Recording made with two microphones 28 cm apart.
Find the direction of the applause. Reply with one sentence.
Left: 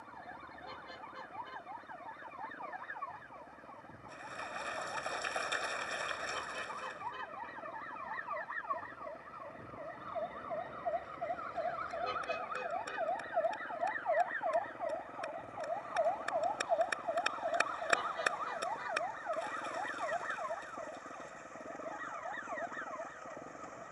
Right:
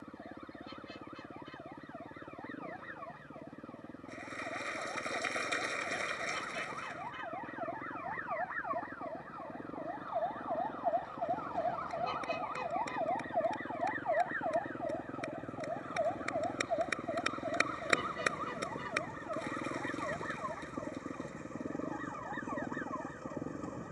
In this clip you hear the applause on the right.